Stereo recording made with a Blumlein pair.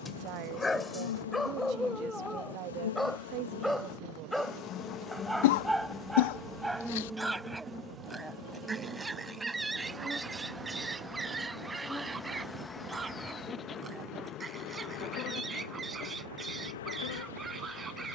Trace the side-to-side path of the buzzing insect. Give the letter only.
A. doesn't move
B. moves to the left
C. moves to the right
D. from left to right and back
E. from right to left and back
D.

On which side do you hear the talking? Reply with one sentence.
You can hear the talking on the right.